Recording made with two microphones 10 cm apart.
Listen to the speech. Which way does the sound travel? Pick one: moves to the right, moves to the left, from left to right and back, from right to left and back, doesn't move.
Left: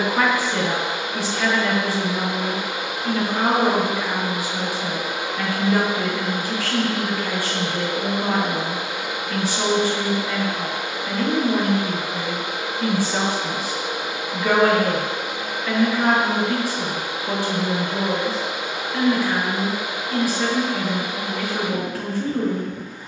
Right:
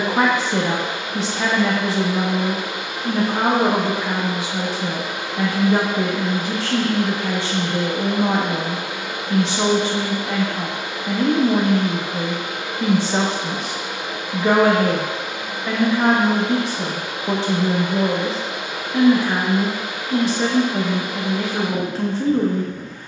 doesn't move.